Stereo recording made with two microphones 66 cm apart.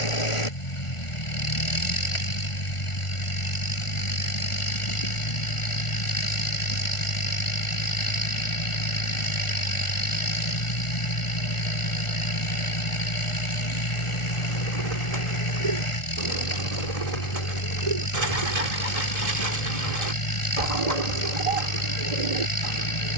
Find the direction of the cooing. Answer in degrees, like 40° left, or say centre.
60° right.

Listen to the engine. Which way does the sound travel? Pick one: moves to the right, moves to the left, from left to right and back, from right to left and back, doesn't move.
doesn't move.